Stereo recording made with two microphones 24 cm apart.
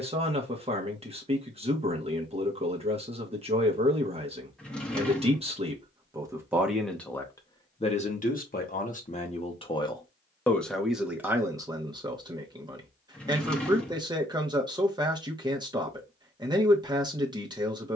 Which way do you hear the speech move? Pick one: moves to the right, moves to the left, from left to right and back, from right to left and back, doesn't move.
from right to left and back.